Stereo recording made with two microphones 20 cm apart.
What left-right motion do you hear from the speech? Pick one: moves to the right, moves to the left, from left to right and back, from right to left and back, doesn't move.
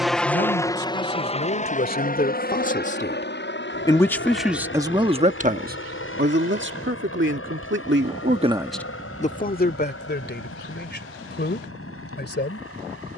from left to right and back.